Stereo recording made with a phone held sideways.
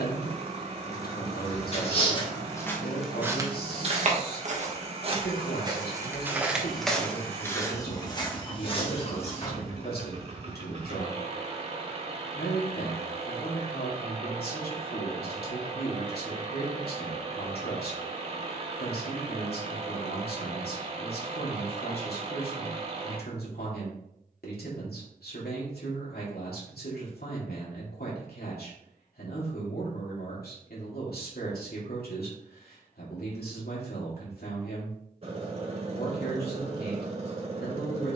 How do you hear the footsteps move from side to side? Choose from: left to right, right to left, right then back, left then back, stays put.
right then back.